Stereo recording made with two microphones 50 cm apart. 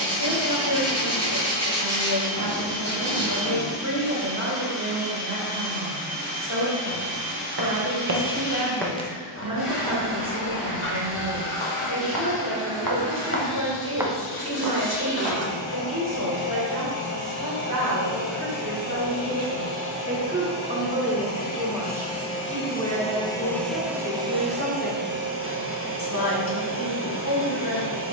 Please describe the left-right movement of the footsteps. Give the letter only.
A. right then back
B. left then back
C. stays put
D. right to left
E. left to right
B.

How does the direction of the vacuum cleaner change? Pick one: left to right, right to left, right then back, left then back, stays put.
left to right.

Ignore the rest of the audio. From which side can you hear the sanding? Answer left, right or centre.
left.